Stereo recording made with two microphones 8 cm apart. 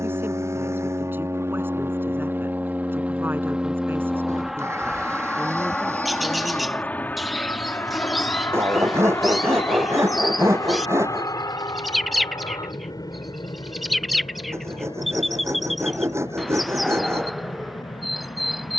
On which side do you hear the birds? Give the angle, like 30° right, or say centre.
centre.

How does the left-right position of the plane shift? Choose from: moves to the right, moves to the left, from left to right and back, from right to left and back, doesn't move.
moves to the left.